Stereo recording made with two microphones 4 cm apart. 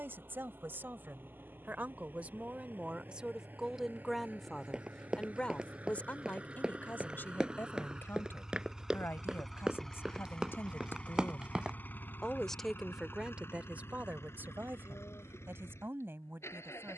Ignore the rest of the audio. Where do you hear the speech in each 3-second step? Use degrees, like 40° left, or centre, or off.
40° right, centre, 50° left, 60° left, 30° right, 60° right.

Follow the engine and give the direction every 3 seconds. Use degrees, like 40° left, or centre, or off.
50° right, 40° right, 20° right, 20° left, 60° left, 80° left.